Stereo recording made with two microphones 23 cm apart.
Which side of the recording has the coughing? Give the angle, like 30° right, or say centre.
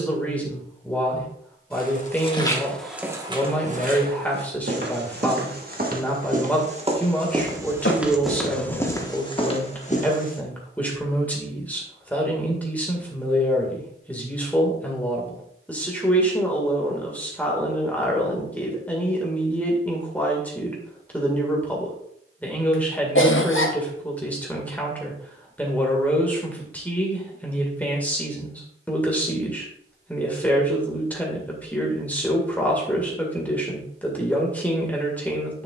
60° left.